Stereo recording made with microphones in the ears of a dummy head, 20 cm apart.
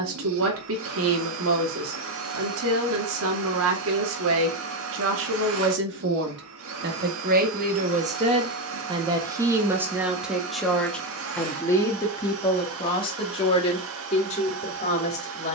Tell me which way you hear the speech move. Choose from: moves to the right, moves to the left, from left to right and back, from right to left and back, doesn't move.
moves to the left.